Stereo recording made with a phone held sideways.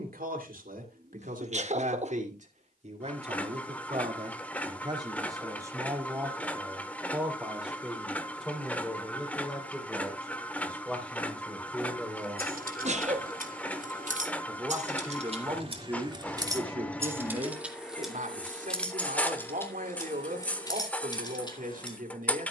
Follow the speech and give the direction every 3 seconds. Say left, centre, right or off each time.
right, right, centre, centre, centre, right, right, right.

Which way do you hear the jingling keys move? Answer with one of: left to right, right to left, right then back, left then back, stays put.
right to left.